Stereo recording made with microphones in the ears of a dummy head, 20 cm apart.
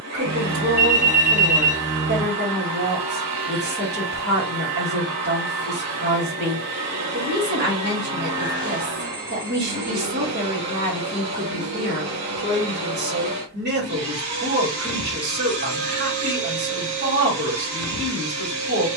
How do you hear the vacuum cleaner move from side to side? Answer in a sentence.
You can hear the vacuum cleaner stay put.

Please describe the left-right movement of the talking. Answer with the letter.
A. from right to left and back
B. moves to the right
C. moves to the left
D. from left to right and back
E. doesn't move
E.